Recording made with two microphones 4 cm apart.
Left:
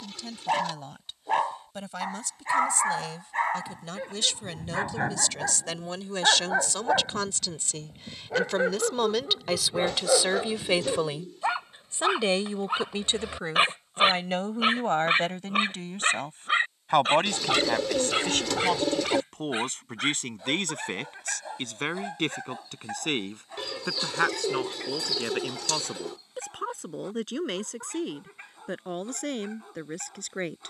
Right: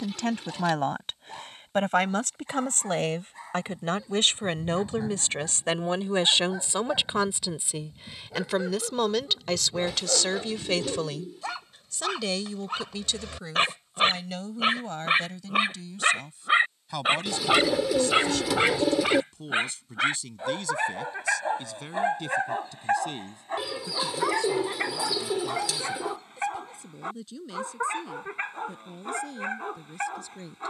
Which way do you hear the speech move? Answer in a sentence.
In this clip you hear the speech move from right to left.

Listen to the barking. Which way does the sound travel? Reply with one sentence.
In this clip you hear the barking move from left to right.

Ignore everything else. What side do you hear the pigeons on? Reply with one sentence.
In this clip you hear the pigeons in the centre.